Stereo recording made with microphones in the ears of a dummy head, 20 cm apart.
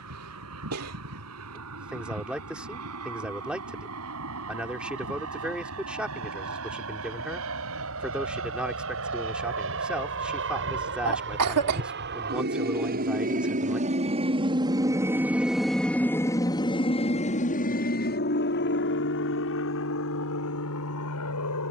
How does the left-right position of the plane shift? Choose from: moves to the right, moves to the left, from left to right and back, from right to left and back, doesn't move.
moves to the left.